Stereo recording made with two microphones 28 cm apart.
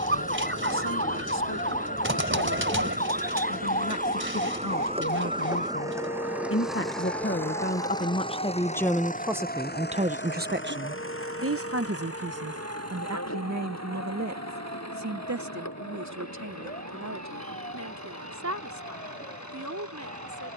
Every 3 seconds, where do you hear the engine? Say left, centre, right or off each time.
right, right, centre, left, left, left, left.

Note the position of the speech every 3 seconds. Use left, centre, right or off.
left, left, left, right, right, right, right.